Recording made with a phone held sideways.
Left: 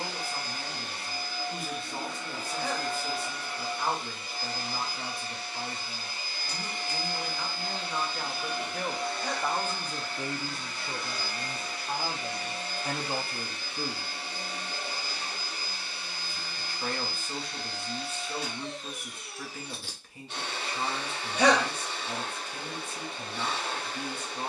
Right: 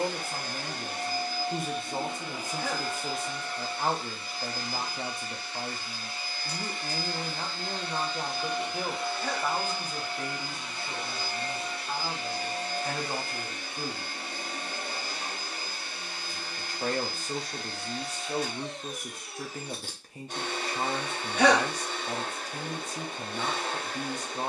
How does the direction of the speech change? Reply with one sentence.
You can hear the speech move from right to left and back again.